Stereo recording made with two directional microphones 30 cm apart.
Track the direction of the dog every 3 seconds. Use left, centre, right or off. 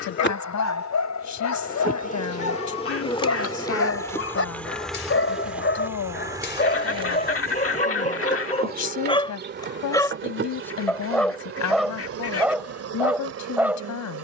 left, left, left, centre, centre.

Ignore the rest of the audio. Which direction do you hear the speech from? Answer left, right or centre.
left.